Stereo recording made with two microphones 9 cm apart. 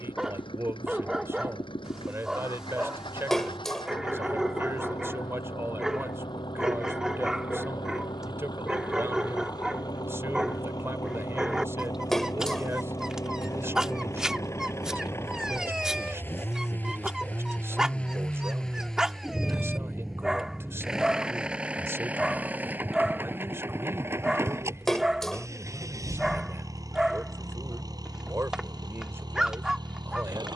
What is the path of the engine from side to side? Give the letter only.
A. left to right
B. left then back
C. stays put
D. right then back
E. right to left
A.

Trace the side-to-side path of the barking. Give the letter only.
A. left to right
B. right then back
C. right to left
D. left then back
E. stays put
E.